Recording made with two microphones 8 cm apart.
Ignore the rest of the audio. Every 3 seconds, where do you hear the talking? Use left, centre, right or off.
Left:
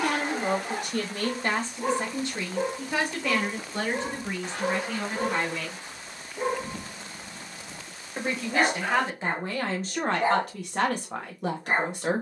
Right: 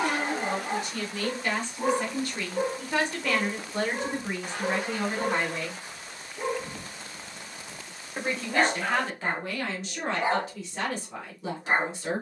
left, centre, centre, left.